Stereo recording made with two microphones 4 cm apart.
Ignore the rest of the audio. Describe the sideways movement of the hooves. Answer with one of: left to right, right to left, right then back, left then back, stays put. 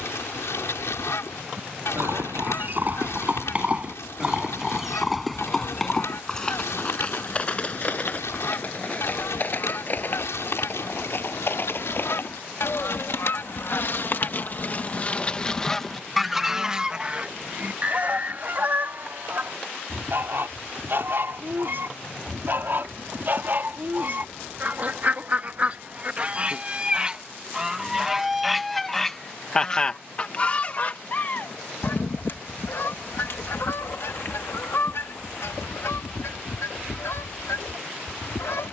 right to left.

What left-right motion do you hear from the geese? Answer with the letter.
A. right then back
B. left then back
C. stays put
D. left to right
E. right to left
A.